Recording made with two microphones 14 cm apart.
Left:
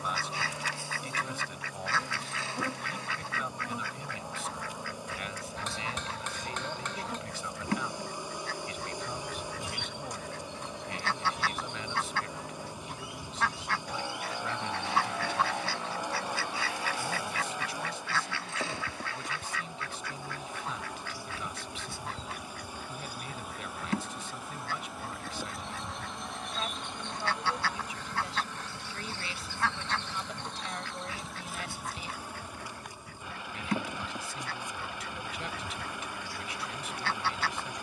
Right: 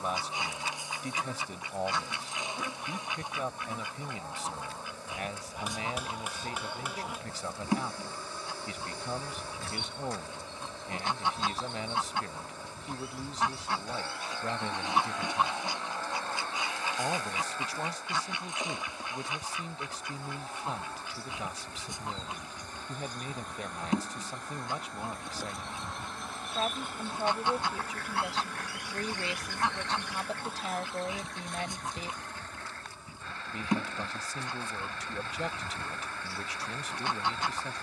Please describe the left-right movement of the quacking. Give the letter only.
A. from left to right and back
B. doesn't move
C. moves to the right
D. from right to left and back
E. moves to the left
B.